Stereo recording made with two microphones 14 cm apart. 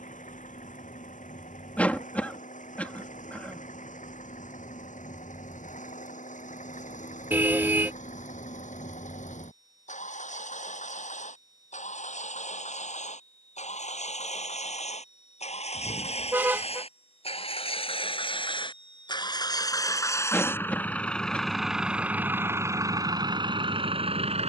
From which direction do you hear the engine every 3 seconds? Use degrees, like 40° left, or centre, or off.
70° left, 70° left, 60° left, 60° left, 60° left, 50° left, 30° left, 20° right.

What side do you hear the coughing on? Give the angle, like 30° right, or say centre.
10° left.